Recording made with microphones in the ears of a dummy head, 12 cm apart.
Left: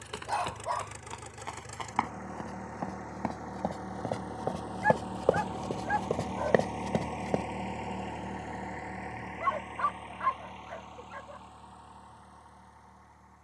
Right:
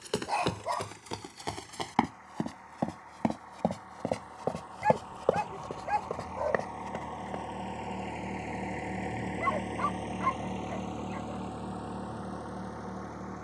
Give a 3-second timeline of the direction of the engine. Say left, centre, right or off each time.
left, left, centre, right, right.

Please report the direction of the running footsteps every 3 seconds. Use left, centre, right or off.
right, centre, left, off, off.